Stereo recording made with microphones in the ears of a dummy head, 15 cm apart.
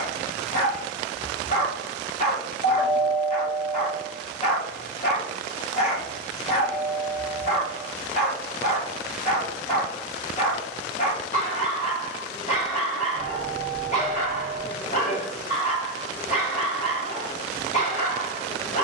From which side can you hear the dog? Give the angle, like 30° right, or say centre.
40° left.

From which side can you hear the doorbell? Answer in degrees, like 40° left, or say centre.
30° left.